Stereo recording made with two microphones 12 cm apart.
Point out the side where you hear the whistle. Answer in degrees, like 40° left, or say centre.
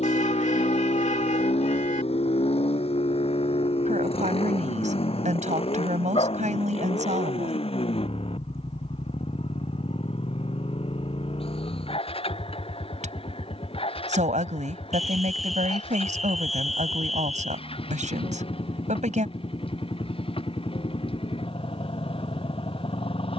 centre.